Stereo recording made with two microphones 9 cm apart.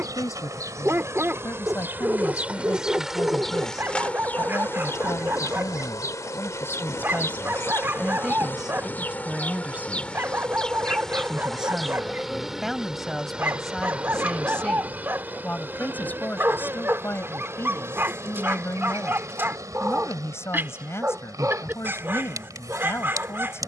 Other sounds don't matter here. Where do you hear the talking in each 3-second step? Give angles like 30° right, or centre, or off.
40° left, 40° left, 10° left, 10° right, centre, 20° left, 30° left, 30° left.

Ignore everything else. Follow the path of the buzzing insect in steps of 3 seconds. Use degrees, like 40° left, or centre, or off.
30° right, 20° left, 30° left, 10° left, 10° right, 30° right, 40° right, 40° right.